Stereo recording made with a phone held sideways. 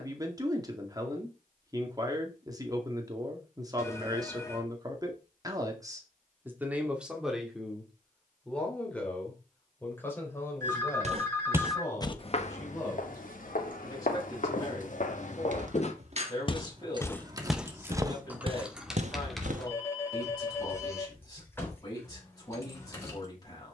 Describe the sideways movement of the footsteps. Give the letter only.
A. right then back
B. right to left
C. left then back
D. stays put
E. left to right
C.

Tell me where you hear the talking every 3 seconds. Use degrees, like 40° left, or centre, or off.
30° right, 30° right, centre, 20° left, 20° left, 30° left, 30° left, 30° left.